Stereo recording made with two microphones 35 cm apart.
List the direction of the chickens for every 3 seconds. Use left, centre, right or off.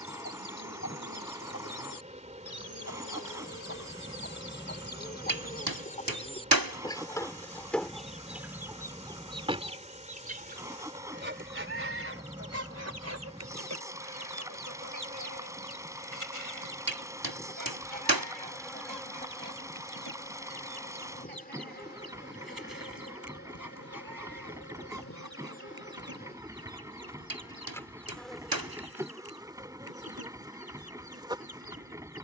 left, left, centre, right, right, right, right, right, right, right, right.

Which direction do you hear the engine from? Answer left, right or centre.
centre.